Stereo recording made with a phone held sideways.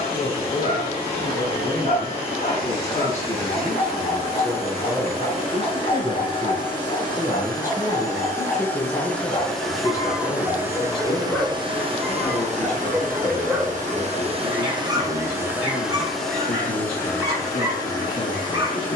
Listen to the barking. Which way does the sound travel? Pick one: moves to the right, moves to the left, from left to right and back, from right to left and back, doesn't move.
moves to the right.